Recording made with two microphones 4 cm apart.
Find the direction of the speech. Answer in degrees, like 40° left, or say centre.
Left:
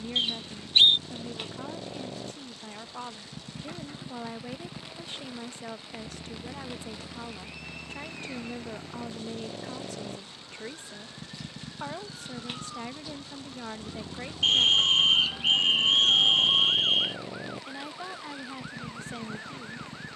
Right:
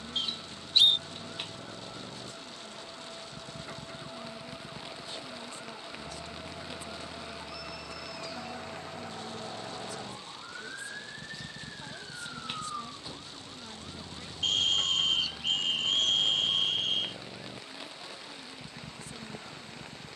50° left.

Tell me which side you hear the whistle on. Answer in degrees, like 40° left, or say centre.
40° left.